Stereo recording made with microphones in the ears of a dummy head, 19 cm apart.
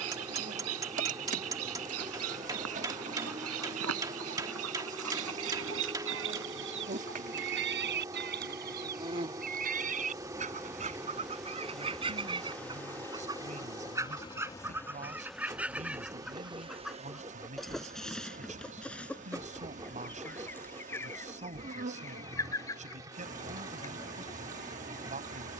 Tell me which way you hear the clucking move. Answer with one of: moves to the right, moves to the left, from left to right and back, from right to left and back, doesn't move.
moves to the left.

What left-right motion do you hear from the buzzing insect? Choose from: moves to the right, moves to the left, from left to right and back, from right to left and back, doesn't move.
from right to left and back.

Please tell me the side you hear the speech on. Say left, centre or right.
right.